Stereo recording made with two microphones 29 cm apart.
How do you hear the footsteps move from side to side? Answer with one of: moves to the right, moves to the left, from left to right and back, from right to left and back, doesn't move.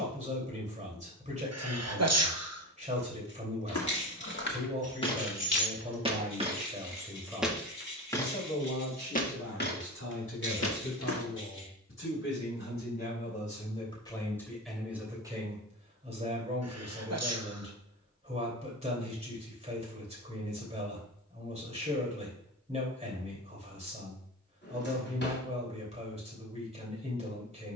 from left to right and back.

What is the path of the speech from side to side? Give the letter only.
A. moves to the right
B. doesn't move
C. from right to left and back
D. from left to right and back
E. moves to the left
C.